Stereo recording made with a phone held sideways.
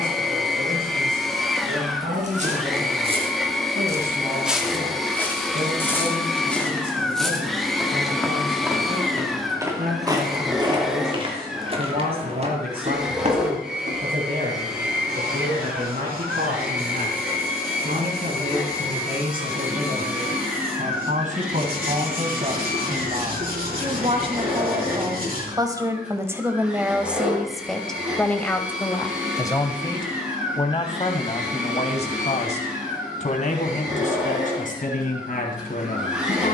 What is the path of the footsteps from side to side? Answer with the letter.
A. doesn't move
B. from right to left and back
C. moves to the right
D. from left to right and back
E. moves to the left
B.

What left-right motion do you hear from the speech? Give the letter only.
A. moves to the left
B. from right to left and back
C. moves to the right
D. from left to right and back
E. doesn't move
A.